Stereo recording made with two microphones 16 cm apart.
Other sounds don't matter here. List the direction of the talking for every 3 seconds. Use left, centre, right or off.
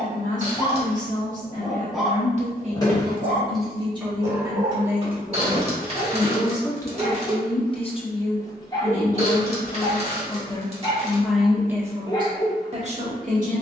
right, right, left, left, right.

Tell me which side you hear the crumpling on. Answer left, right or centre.
right.